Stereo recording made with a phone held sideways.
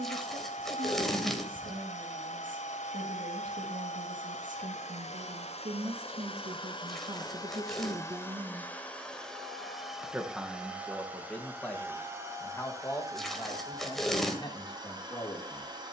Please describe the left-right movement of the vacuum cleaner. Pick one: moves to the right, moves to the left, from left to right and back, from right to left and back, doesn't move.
moves to the right.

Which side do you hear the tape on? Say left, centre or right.
centre.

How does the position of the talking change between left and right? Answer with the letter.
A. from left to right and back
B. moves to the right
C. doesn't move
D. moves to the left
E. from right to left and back
D.